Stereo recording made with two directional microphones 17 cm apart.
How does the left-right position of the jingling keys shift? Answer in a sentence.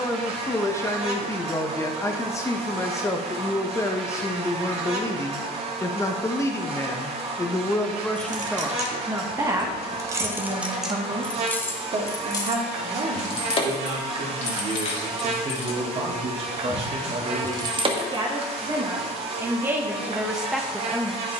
In this clip you hear the jingling keys go left and come back.